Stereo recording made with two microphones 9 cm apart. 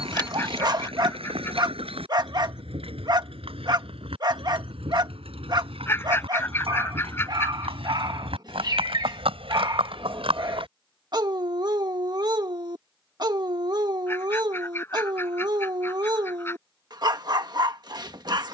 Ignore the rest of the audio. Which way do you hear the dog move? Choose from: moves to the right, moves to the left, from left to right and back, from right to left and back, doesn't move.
doesn't move.